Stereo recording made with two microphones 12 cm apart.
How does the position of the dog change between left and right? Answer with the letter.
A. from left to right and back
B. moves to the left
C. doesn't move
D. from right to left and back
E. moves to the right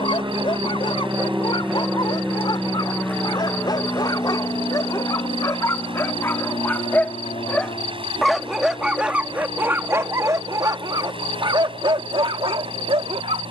E.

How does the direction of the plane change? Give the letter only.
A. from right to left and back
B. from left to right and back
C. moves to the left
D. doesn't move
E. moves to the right
C.